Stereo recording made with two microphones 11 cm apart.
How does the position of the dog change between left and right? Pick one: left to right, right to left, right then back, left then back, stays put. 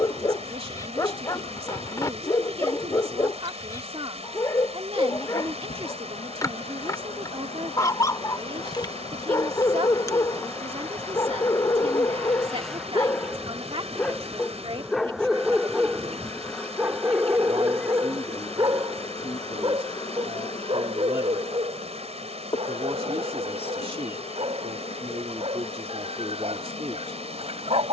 left to right.